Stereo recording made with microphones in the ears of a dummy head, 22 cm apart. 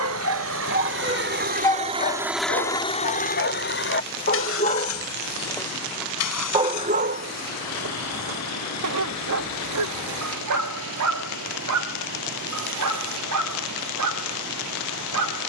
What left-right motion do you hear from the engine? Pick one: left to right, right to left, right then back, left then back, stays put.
right to left.